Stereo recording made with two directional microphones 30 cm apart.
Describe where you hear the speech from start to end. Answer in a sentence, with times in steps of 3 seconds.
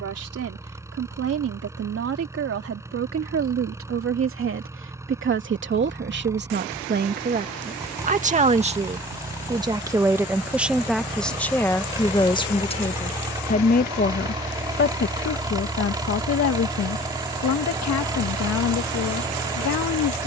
In this clip you hear the speech on the right from 0 s, in the centre from 9 s and on the left from 12 s.